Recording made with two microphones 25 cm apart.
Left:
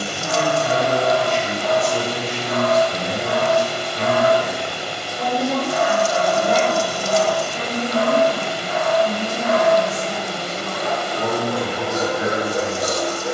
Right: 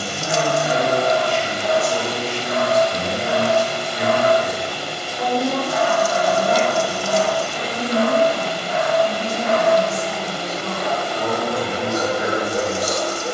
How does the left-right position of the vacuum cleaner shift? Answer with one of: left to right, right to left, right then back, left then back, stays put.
stays put.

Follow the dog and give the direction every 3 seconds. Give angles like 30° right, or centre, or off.
20° right, 10° right, 40° left, 30° left, 20° right.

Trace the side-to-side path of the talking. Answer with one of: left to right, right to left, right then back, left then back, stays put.
right to left.